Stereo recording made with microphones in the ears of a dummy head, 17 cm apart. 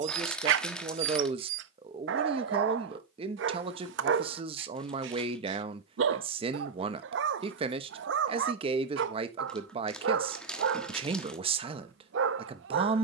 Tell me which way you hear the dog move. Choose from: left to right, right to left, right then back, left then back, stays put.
stays put.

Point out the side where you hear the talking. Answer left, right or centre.
right.